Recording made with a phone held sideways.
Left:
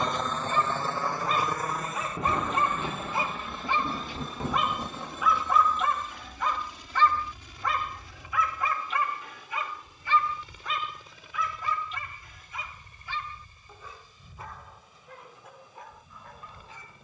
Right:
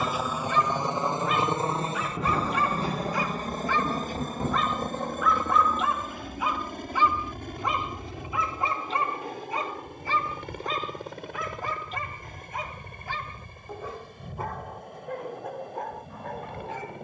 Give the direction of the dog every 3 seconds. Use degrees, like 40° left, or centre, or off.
30° left, 10° left, 20° right, 40° right, 60° right, 60° right.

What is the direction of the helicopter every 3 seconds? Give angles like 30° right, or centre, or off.
20° right, 40° right, 50° right, 60° right, 60° right, 60° right.